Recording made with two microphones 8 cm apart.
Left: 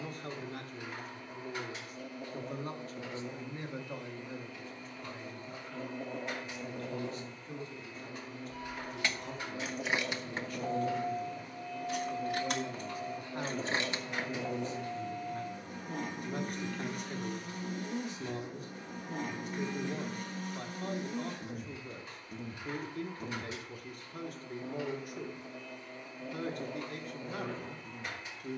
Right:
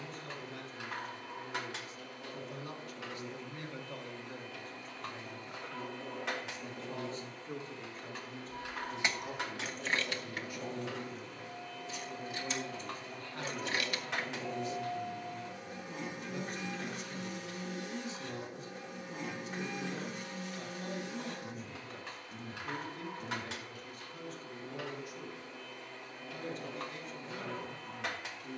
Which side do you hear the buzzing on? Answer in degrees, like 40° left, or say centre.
50° left.